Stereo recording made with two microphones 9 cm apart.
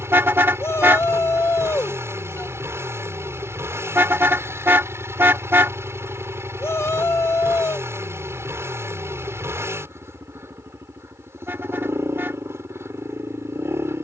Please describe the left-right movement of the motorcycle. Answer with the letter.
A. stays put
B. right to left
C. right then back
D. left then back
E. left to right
A.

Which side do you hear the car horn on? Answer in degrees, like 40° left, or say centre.
20° right.